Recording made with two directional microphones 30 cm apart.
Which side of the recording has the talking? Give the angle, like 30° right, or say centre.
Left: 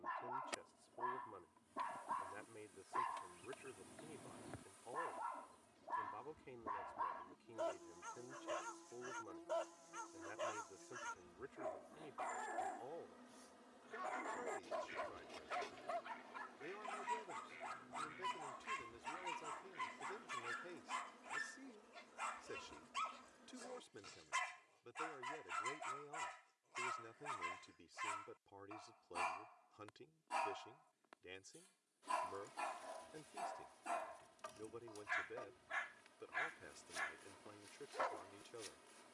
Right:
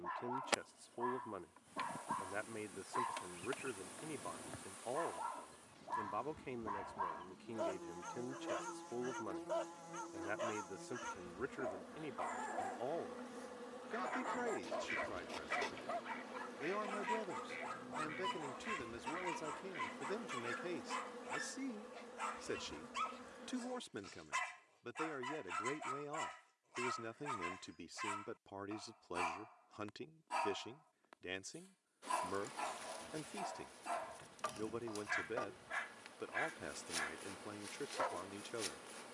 60° right.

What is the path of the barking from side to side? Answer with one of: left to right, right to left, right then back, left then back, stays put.
stays put.